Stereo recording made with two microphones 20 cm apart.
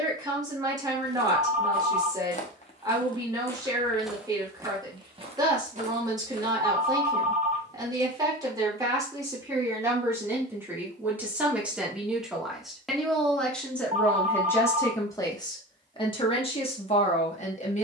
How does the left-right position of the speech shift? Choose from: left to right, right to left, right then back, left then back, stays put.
right to left.